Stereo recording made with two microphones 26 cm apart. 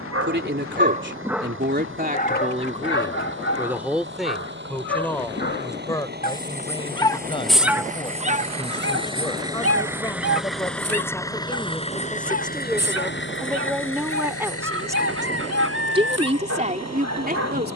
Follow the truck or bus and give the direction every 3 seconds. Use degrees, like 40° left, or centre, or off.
50° right, 50° right, 30° right, centre, 50° left, 80° left.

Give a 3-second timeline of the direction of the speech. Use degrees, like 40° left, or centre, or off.
40° right, centre, 20° left, 10° left, centre, 30° right.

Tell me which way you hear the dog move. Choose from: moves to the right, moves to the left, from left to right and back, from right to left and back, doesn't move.
from right to left and back.